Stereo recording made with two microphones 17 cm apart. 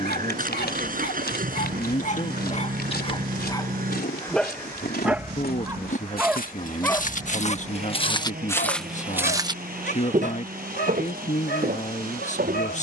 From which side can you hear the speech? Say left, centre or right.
left.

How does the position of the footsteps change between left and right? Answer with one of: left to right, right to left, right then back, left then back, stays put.
left to right.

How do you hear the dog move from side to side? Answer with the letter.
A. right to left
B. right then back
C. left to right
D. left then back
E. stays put
B.